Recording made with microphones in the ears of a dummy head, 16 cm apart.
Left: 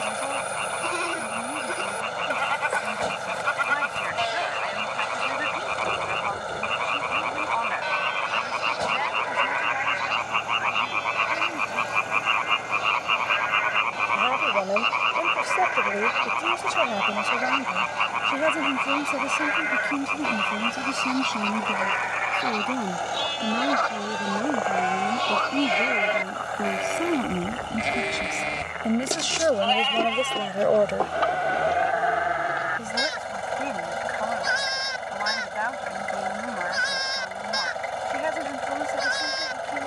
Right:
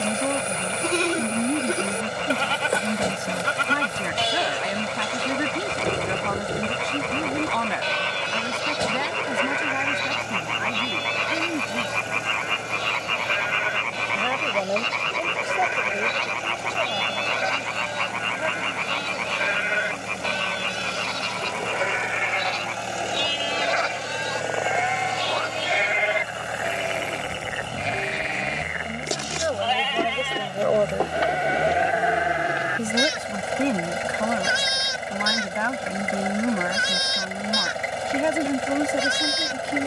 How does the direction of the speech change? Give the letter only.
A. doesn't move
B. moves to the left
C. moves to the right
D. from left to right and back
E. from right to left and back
E.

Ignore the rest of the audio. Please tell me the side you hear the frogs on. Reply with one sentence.
In this clip you hear the frogs in the centre.